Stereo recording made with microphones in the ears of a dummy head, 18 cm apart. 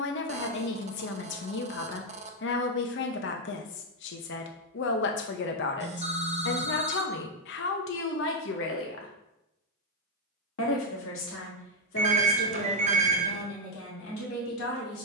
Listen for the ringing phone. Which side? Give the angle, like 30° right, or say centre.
30° right.